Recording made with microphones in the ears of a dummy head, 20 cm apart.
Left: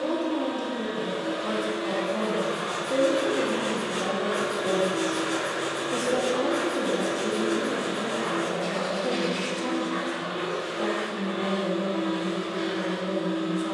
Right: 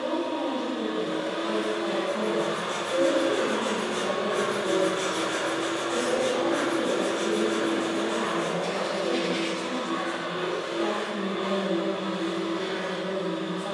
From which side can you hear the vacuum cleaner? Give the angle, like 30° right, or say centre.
10° left.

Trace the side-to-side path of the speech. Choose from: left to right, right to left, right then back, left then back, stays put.
stays put.